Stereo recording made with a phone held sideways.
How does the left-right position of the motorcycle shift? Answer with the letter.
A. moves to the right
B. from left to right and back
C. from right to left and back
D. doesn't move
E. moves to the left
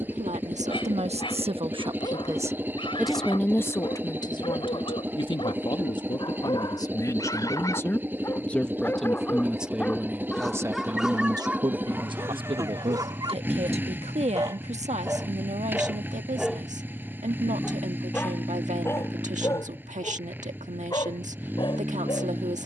D.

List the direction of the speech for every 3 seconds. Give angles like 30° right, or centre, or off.
50° right, 30° left, 20° left, 20° right, 50° right, 60° right, 60° right, 60° right.